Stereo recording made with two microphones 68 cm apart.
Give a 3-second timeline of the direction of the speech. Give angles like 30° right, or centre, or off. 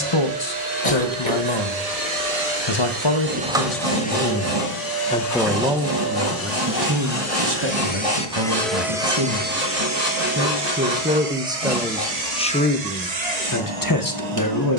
40° left, 20° left, 30° right, 20° right, 20° left.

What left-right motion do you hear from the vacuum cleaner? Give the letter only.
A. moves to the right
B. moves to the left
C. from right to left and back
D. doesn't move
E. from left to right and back
C.